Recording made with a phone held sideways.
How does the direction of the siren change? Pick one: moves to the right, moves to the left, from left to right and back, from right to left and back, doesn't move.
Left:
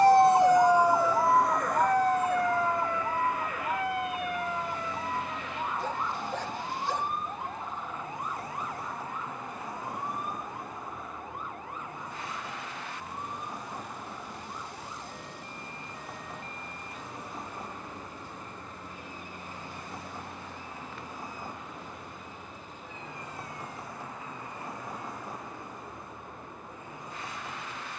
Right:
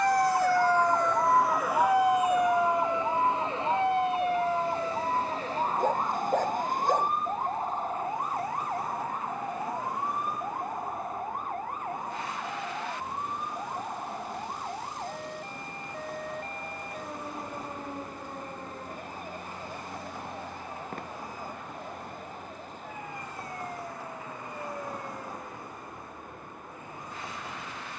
moves to the right.